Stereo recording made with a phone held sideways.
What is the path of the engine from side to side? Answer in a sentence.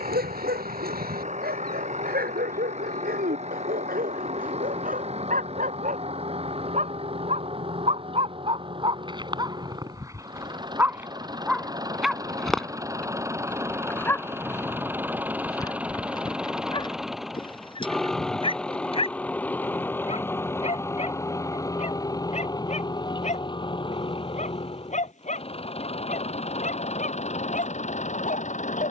In this clip you hear the engine move to the left.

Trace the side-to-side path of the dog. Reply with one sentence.
You can hear the dog go from the right side to the left.